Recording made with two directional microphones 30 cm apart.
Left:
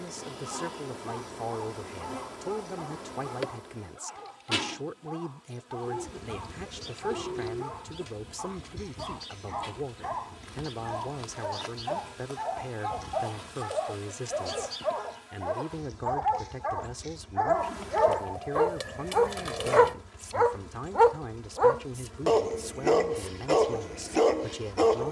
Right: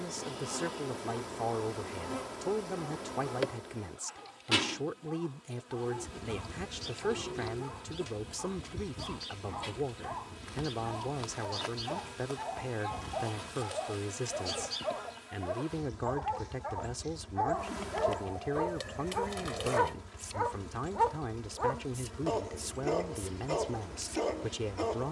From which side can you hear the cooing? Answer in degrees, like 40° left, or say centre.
30° left.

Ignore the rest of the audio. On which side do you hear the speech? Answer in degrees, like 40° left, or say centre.
10° right.